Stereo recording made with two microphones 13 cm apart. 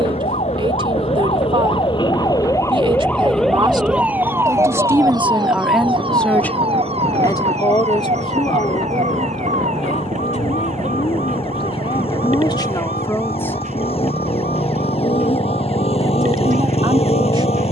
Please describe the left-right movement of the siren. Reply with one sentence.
In this clip you hear the siren move from left to right.